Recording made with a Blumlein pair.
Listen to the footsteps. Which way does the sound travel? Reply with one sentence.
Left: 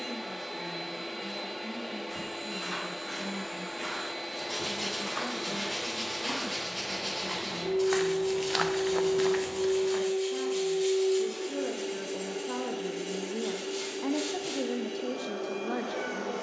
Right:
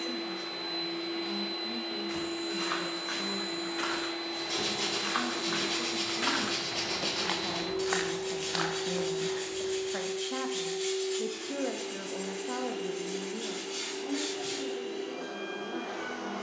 In this clip you hear the footsteps move to the left.